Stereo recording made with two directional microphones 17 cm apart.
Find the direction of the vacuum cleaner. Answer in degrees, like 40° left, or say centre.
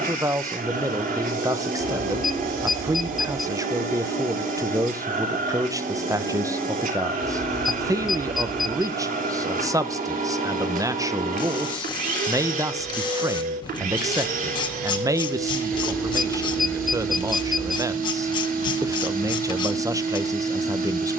60° right.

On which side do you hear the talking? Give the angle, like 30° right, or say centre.
20° right.